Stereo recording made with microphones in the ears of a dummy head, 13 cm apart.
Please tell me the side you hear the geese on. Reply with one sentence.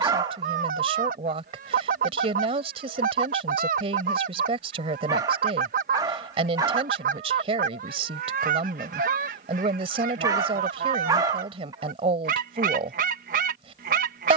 In this clip you hear the geese on the right.